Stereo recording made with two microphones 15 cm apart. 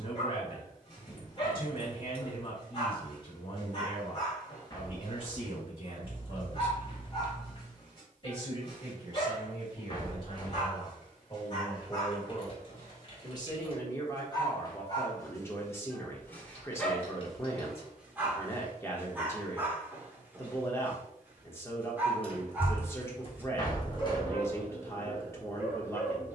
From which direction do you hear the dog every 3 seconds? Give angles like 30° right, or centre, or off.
40° left, 40° left, 40° left, 40° left, 30° left, 10° left, 10° right, 10° right, 10° right.